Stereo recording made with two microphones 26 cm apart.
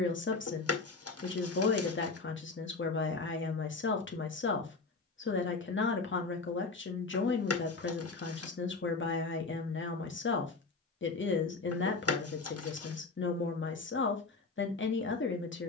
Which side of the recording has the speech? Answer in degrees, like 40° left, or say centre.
50° left.